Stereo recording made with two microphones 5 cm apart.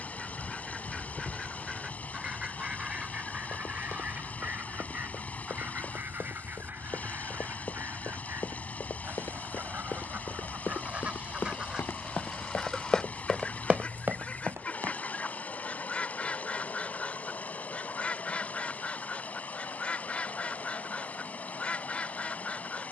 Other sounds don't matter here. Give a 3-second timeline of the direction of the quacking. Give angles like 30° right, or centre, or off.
10° right, 30° right, 50° right, 30° right, 10° left, 20° left, 20° left, 20° left.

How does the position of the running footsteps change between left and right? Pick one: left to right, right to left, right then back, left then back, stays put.
left to right.